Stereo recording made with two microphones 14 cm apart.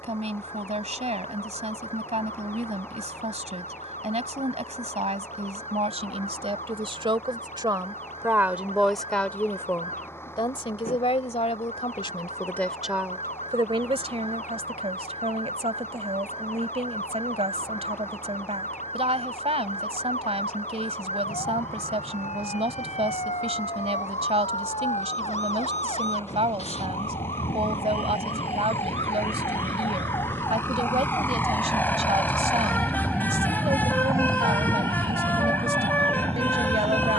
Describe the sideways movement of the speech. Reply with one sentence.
You can hear the speech go left and come back.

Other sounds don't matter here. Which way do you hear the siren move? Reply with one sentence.
You can hear the siren move from left to right.